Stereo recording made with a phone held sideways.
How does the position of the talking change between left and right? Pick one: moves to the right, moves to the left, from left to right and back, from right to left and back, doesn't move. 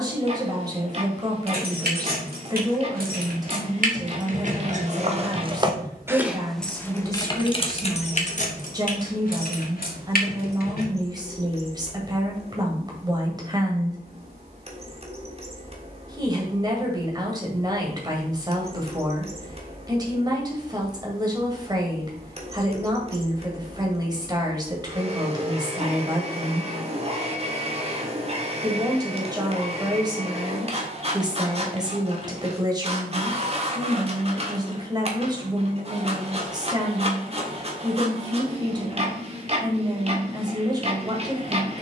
doesn't move.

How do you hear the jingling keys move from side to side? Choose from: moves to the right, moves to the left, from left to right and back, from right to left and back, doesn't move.
moves to the left.